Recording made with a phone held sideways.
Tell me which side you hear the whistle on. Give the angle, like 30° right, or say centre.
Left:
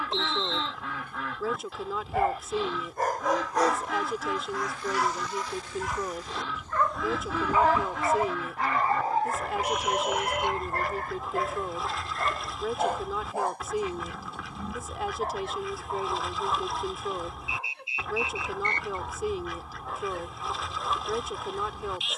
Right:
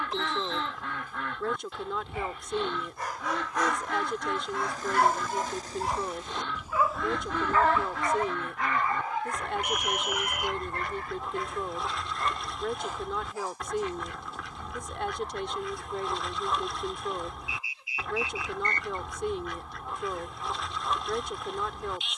30° left.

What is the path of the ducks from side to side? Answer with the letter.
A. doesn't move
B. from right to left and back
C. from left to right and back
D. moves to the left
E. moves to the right
A.